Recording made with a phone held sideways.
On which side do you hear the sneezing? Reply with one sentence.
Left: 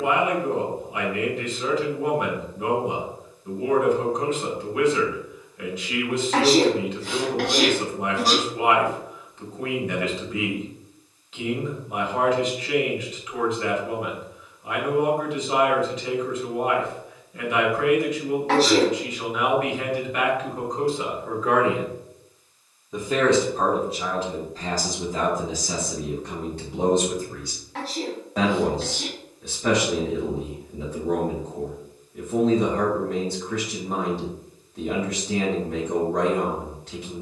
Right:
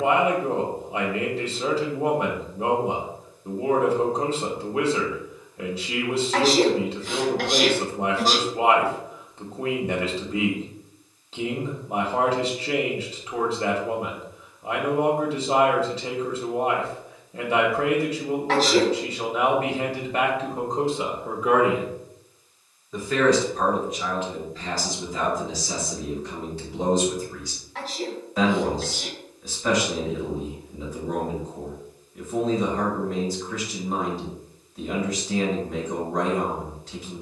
In this clip you hear the sneezing on the left.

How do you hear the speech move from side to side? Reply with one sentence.
You can hear the speech move from right to left.